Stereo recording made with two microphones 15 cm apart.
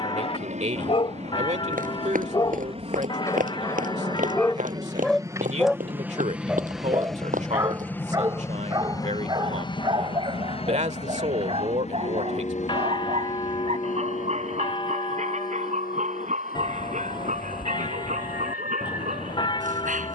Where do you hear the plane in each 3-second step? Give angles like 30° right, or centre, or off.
50° right, 30° right, 10° left, 40° left, 50° left, 60° left, 70° left.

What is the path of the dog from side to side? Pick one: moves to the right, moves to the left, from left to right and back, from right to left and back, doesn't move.
moves to the right.